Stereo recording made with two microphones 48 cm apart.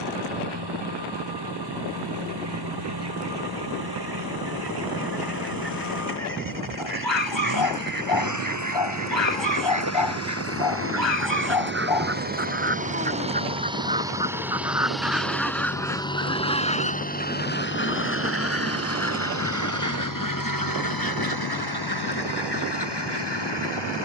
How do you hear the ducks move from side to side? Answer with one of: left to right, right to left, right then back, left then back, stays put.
right to left.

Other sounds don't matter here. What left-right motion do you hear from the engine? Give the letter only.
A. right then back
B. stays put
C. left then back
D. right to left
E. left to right
D.